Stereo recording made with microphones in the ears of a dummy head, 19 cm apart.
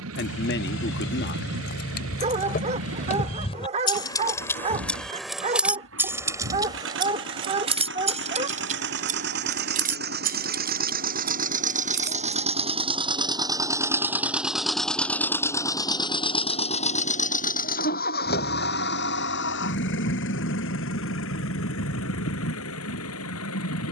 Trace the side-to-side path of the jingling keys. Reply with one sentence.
In this clip you hear the jingling keys move to the right.